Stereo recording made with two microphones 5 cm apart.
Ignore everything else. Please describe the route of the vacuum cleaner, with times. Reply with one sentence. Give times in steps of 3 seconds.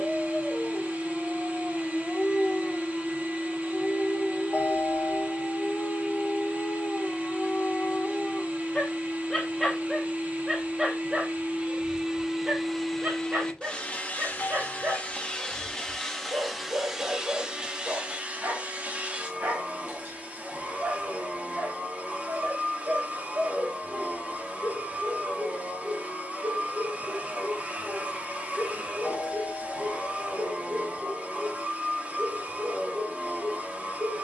In this clip you hear the vacuum cleaner on the right from 0 s, in the centre from 12 s and on the right from 18 s.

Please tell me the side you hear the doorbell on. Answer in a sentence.
You can hear the doorbell on the left.